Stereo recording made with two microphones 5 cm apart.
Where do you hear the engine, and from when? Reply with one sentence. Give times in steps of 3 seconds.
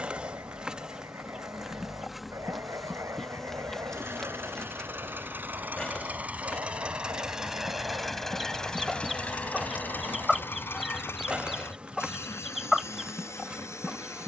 You can hear the engine on the right from 0 s, in the centre from 6 s and on the left from 9 s.